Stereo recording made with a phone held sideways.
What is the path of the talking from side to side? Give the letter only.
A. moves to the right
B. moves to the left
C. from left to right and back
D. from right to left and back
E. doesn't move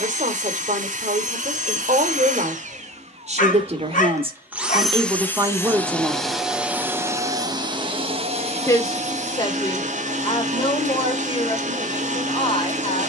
B.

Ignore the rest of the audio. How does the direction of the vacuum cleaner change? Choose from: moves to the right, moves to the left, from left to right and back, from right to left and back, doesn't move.
from right to left and back.